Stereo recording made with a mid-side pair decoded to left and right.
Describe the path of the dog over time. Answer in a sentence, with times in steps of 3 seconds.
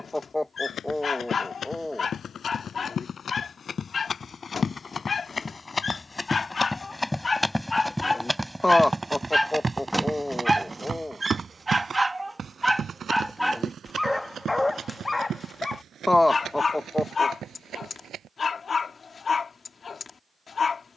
You can hear the dog on the left from 0 s, in the centre from 9 s and on the left from 15 s.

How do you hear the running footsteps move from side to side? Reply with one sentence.
You can hear the running footsteps travel towards the right.